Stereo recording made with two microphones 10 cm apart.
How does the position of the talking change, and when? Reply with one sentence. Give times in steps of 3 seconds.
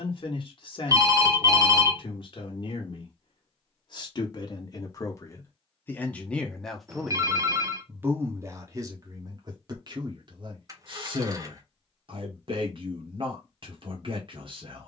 In this clip you hear the talking on the left from 0 s, in the centre from 6 s and on the right from 9 s.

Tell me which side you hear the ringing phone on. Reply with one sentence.
You can hear the ringing phone on the right.